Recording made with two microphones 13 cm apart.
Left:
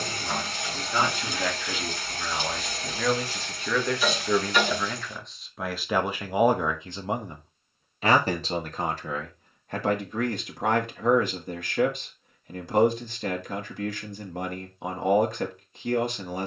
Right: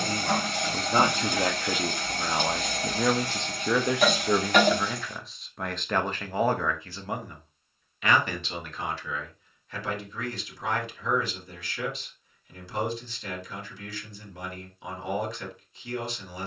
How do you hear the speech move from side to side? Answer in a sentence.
You can hear the speech move from right to left.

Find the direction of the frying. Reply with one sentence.
You can hear the frying on the right.